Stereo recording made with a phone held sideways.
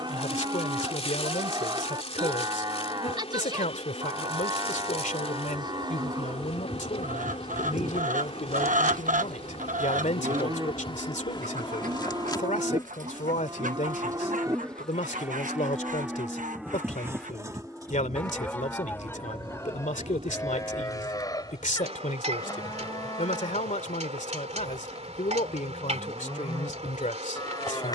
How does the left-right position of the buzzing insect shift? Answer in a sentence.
In this clip you hear the buzzing insect move to the right.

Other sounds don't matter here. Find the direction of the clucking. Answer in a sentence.
In this clip you hear the clucking on the right.